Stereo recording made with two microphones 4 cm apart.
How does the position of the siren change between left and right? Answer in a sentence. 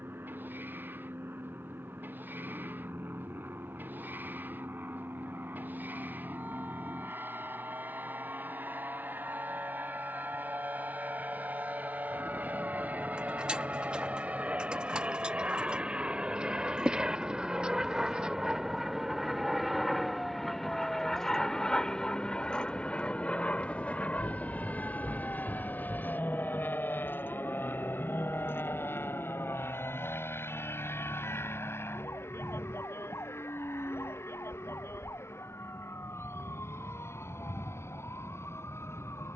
You can hear the siren move to the left.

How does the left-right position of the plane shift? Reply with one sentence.
In this clip you hear the plane move to the left.